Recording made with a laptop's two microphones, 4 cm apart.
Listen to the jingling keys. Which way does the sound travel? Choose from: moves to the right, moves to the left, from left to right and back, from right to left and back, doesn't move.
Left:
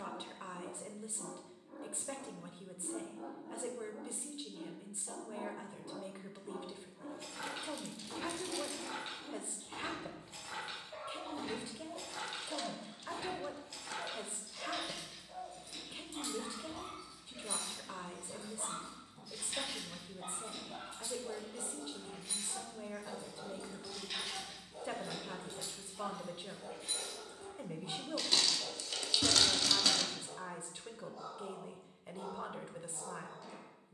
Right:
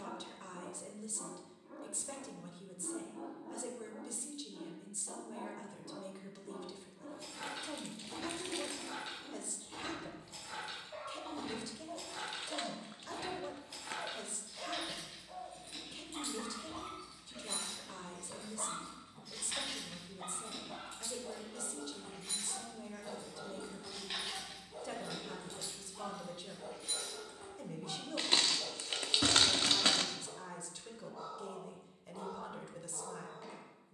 from left to right and back.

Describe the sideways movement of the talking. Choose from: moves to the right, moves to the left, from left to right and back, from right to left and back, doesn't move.
doesn't move.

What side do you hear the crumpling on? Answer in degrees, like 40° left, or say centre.
40° right.